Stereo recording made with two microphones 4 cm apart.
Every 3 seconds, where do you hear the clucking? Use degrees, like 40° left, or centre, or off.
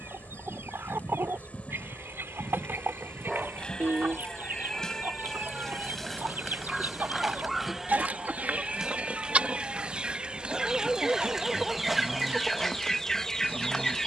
60° right, 60° right, 40° right, 20° right, 10° left.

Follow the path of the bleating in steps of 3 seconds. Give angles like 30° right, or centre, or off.
30° left, 20° left, 10° right, 30° right, 30° right.